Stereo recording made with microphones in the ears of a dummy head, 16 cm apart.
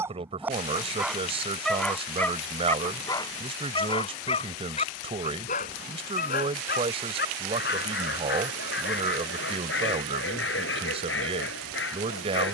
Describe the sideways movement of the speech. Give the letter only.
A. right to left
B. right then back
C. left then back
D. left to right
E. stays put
E.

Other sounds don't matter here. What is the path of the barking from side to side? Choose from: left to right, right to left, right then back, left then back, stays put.
right to left.